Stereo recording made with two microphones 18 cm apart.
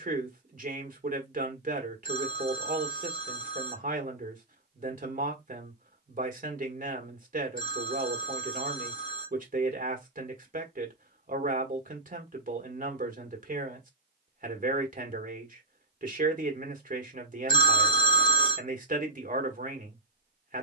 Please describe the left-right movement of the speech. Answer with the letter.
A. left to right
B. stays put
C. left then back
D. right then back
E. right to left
B.